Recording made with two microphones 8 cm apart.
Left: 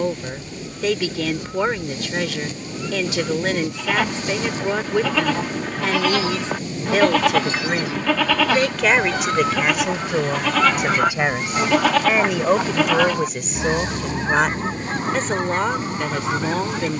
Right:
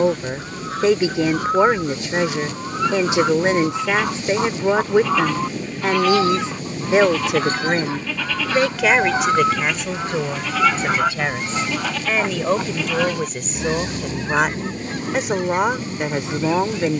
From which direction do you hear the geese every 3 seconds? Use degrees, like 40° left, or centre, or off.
70° right, 60° right, 40° right, 10° right, 30° left, 50° left.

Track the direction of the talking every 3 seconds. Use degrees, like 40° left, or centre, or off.
20° right, 20° right, 20° right, 10° left, centre, 20° right.